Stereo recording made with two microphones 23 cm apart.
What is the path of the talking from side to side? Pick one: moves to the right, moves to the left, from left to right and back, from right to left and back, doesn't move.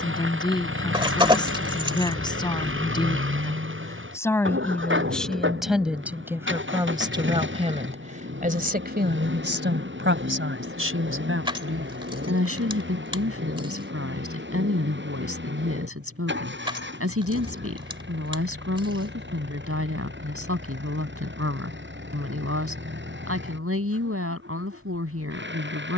moves to the right.